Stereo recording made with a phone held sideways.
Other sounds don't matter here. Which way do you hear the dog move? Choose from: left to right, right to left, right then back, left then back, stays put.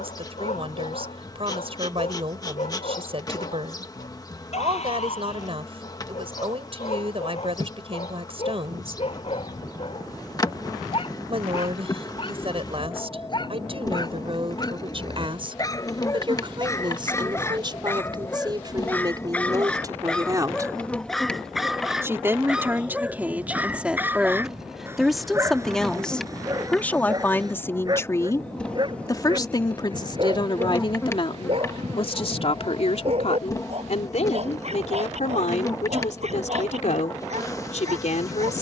left to right.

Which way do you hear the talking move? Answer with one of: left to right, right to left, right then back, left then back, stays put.
right to left.